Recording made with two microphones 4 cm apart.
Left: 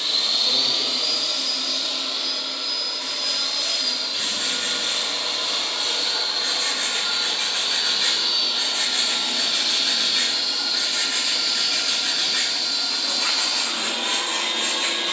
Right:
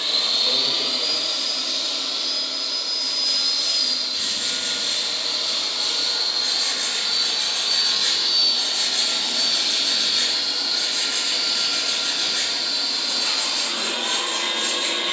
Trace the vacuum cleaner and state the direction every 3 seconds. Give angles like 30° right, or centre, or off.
centre, 40° left, 30° left, centre, 20° right.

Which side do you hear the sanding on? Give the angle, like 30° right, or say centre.
40° left.